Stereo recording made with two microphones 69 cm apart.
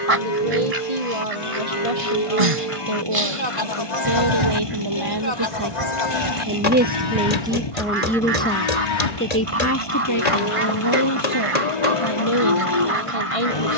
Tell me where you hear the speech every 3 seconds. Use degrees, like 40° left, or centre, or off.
50° right, 40° right, centre, 30° left, 50° left.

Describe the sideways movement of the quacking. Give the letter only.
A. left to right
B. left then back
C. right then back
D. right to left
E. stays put
E.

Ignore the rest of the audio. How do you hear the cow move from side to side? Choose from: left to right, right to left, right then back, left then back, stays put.
stays put.